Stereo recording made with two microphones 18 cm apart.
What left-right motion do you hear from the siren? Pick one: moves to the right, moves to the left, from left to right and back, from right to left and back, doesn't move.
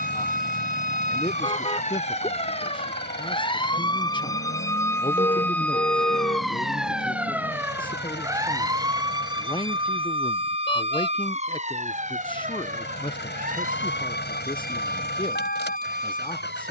moves to the right.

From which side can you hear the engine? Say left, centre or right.
left.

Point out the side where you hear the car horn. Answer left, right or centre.
left.